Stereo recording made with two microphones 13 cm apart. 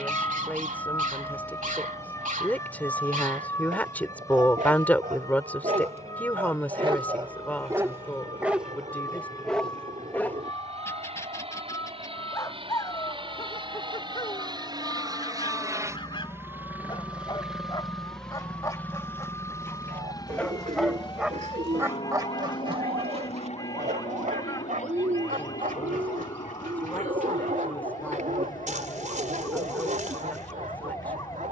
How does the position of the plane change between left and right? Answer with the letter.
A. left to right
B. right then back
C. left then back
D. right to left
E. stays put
D.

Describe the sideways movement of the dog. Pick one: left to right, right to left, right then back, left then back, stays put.
left then back.